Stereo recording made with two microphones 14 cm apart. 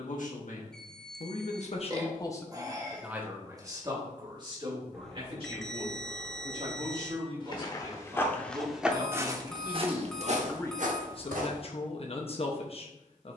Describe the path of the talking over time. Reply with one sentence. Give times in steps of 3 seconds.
In this clip you hear the talking on the left from 0 s, on the right from 3 s, in the centre from 9 s and on the left from 12 s.